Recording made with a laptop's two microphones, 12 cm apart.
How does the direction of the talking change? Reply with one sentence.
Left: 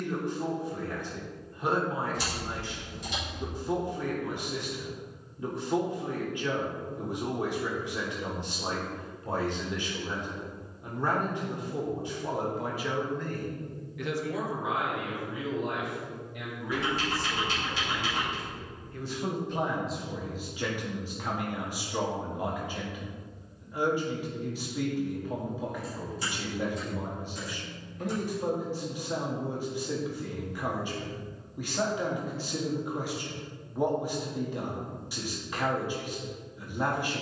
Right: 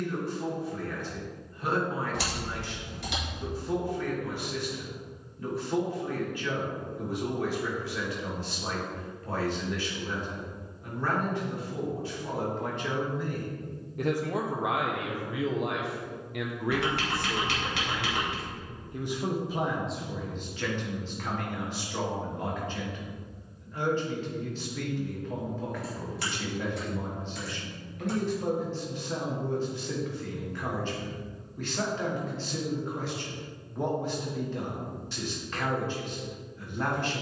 In this clip you hear the talking move from left to right and back again.